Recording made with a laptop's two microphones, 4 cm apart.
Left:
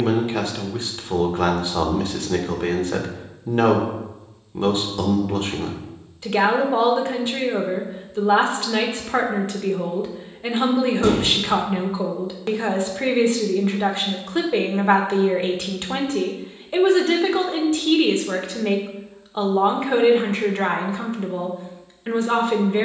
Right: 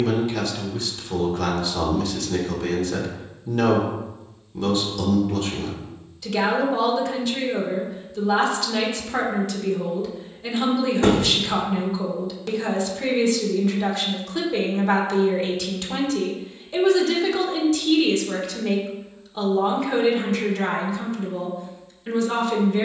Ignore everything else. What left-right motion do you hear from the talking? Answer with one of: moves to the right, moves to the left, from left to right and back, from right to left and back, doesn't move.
doesn't move.